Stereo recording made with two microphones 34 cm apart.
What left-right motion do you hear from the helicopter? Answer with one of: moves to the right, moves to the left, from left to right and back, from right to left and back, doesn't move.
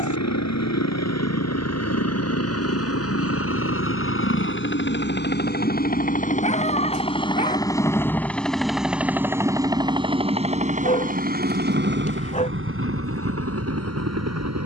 moves to the right.